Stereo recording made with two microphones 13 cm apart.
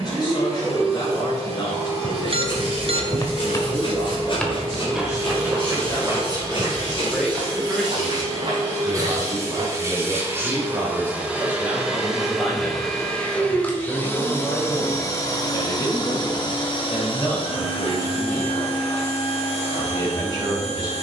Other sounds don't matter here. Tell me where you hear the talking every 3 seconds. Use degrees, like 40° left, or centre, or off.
30° left, 30° left, centre, 20° right, 20° left, 30° left, 30° left.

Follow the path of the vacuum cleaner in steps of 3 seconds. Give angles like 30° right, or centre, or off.
50° right, 50° right, 40° right, 20° right, 10° left, 40° left, 60° left.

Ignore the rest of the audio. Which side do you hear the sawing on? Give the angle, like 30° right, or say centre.
40° left.